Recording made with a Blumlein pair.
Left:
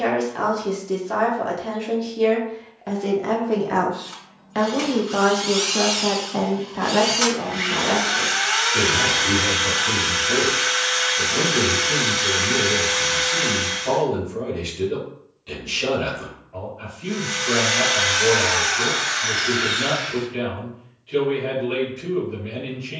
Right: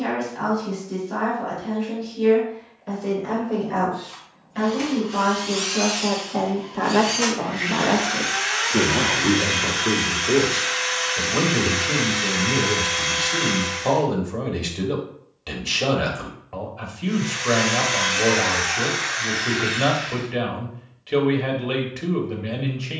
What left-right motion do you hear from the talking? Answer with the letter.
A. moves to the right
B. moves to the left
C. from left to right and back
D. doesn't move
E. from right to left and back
A.